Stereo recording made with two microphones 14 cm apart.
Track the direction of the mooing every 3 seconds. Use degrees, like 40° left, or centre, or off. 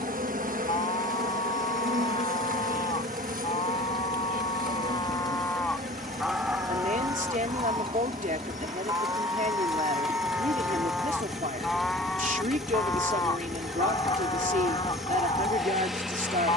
50° left, 40° left, 20° right, 10° right, 30° left, 40° left.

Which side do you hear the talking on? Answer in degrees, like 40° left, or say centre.
70° right.